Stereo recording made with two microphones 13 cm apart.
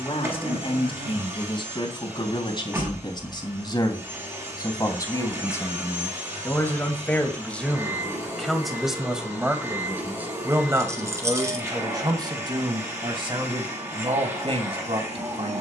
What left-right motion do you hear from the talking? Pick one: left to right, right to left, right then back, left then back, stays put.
left to right.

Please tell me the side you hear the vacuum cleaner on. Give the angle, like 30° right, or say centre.
20° right.